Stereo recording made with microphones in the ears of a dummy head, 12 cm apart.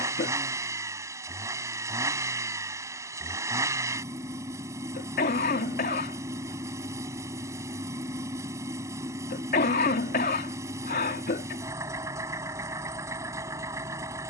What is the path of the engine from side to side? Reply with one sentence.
In this clip you hear the engine stay put.